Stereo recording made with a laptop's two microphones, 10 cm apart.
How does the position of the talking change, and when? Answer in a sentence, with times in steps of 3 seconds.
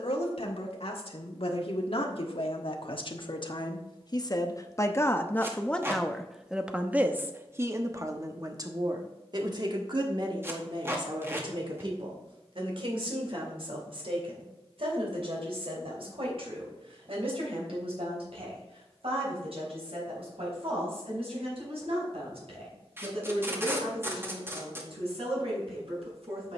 You can hear the talking on the left from 0 s and on the right from 6 s.